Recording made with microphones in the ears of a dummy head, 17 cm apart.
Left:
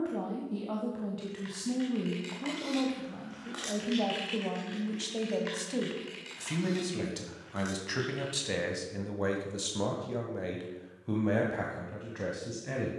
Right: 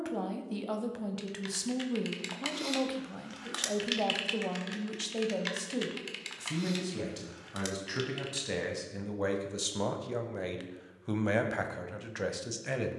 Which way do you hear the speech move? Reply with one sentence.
You can hear the speech move from right to left and back again.